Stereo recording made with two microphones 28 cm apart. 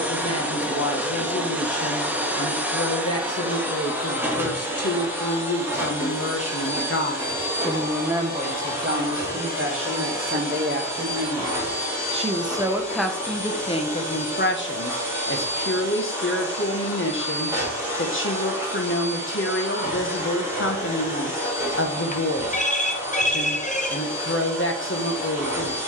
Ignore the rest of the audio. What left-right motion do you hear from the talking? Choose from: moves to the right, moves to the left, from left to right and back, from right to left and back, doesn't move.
from left to right and back.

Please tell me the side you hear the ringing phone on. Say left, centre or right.
left.